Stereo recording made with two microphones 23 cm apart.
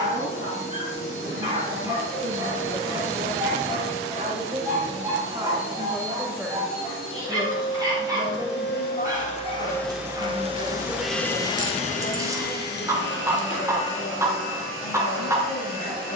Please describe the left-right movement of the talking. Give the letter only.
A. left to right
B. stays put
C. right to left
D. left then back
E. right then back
C.